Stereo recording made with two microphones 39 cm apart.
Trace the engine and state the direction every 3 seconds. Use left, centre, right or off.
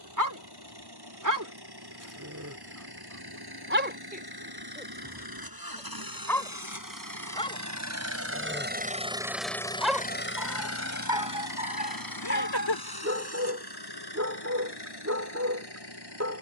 right, right, right, left, left, left.